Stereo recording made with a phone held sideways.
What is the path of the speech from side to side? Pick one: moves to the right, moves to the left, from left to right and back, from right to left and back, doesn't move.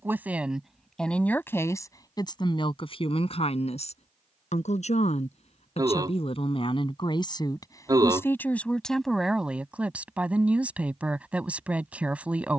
from right to left and back.